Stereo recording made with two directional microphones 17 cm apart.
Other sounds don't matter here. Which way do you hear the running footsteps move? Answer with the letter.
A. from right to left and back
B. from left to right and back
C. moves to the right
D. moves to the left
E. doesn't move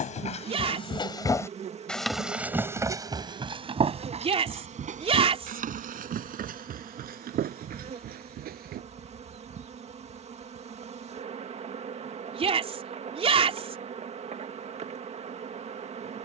C.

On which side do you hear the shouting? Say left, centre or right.
right.